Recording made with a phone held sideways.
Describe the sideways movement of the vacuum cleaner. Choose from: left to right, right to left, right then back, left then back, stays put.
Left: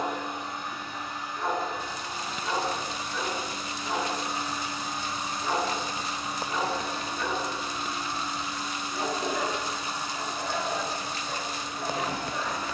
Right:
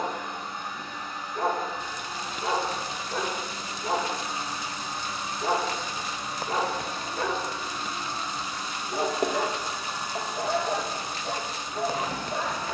left to right.